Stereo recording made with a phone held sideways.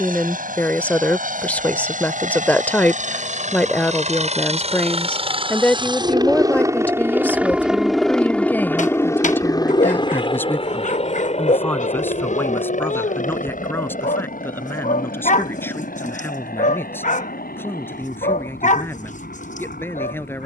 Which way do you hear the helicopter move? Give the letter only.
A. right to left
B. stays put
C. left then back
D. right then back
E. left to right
A.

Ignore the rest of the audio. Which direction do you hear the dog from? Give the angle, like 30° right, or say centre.
50° left.